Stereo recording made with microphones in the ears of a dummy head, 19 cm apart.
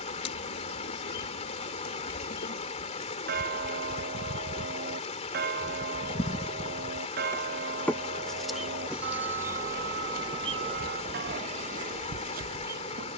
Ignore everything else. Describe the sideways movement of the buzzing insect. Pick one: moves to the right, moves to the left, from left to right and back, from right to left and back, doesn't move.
moves to the right.